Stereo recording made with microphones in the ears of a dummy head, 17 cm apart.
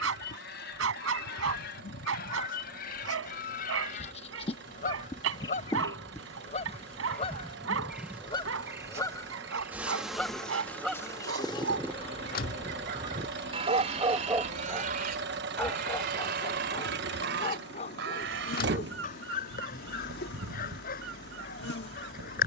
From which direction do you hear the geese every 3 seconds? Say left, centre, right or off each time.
left, left, left, centre, right, right, right, right.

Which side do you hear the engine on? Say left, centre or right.
right.